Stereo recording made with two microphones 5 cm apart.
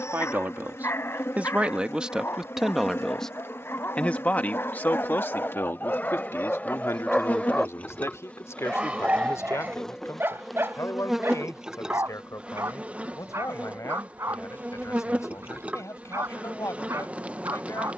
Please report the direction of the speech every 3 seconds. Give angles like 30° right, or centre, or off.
20° right, 30° left, 60° left, 70° left, 80° left, 80° left.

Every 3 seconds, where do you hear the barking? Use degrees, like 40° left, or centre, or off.
60° left, 50° left, 10° left, 50° right, 70° right, 70° right.